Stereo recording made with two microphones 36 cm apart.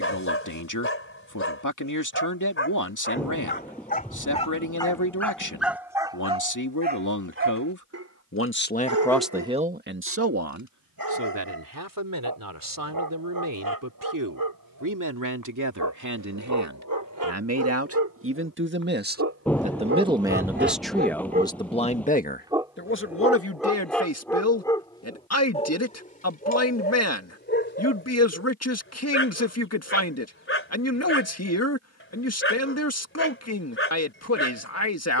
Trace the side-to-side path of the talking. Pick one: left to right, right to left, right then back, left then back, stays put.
right then back.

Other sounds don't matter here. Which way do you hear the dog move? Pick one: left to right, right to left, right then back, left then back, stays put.
right then back.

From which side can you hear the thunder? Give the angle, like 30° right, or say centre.
centre.